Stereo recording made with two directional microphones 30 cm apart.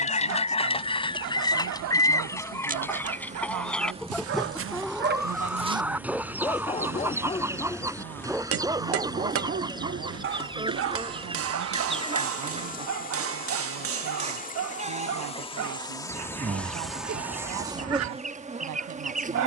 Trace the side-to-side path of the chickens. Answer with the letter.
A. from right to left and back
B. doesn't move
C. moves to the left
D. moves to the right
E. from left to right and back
D.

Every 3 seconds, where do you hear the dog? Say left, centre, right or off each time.
right, right, centre, right, right, right, right.